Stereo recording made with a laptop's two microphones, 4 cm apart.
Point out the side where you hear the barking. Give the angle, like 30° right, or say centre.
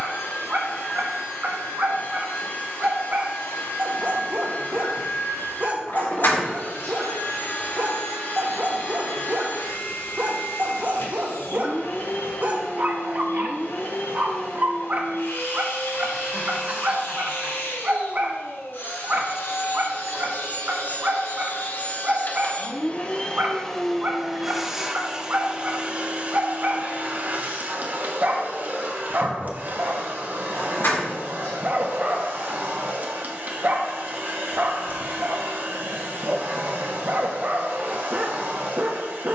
40° right.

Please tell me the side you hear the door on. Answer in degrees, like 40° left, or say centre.
70° left.